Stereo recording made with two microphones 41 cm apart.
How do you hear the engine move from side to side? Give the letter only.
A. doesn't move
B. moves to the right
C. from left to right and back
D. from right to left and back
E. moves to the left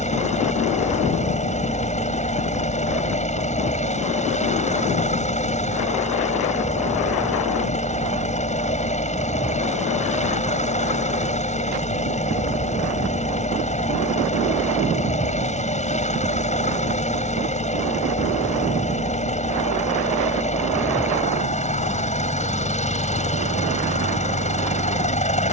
A.